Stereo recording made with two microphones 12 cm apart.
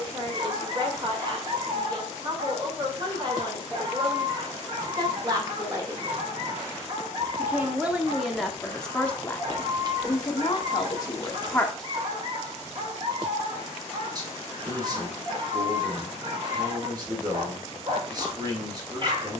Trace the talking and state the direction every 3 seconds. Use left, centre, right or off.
right, right, centre, left, right, right, right.